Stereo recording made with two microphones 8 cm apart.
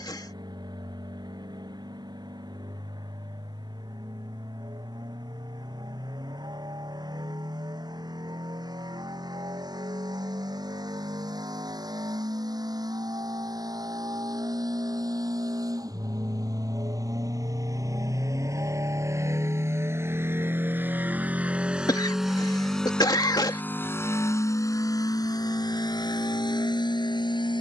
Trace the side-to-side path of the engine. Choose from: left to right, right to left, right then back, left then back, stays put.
right to left.